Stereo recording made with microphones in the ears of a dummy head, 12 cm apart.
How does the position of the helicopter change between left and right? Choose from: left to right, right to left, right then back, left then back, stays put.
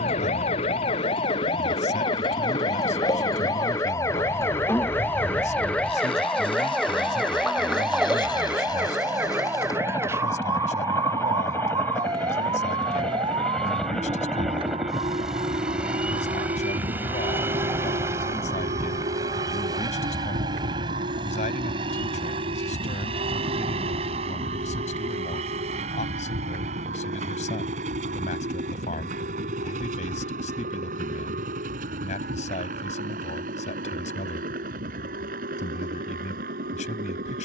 left to right.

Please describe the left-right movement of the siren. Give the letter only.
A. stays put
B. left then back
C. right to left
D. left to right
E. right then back
D.